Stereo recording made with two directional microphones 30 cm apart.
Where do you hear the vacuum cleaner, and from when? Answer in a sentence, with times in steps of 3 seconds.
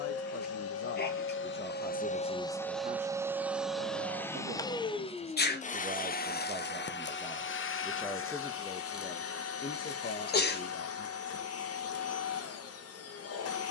In this clip you hear the vacuum cleaner on the left from 0 s, in the centre from 3 s and on the left from 6 s.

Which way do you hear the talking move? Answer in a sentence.
In this clip you hear the talking go right and come back.